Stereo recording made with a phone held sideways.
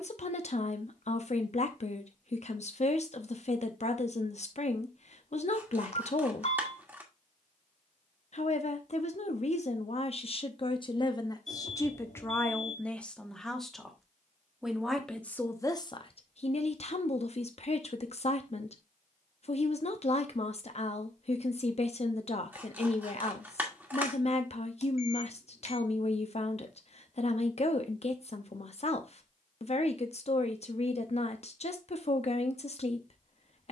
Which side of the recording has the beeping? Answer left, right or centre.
left.